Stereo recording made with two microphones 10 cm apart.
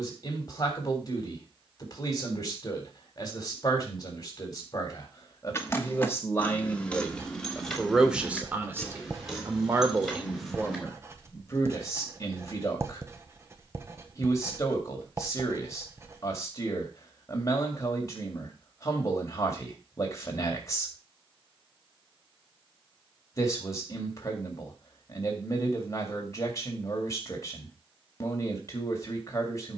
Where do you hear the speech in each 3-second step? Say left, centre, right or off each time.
left, left, centre, centre, left, left, left, left, left, left.